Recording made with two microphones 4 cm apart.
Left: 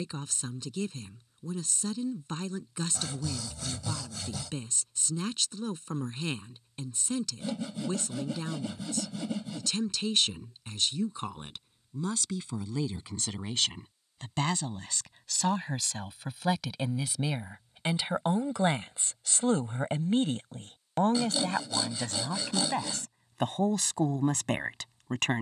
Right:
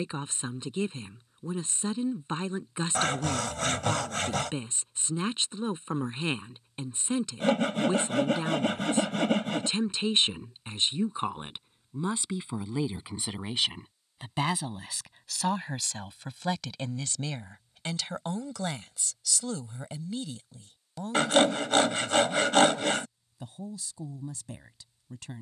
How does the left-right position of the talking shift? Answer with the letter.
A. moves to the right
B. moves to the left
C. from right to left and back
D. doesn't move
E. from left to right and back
B.